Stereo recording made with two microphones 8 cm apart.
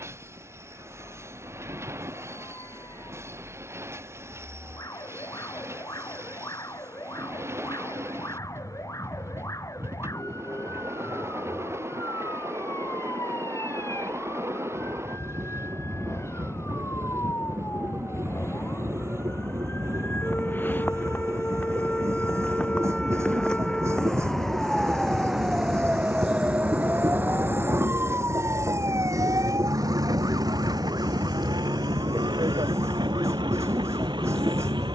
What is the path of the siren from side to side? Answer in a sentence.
In this clip you hear the siren go from the left side to the right.